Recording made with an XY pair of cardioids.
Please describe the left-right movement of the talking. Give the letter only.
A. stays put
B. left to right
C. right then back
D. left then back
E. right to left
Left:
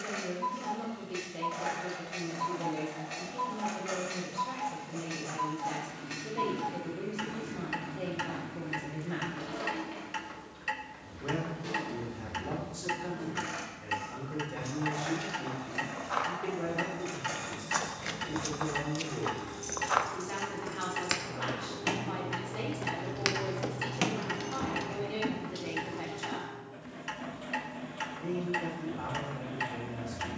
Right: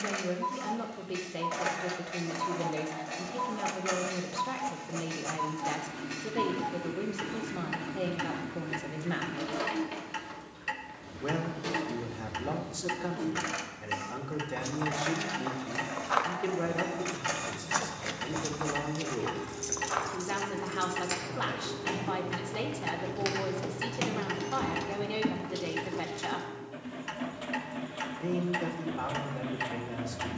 A.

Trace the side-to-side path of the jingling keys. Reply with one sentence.
You can hear the jingling keys move from right to left and back again.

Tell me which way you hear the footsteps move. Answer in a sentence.
In this clip you hear the footsteps move from right to left and back again.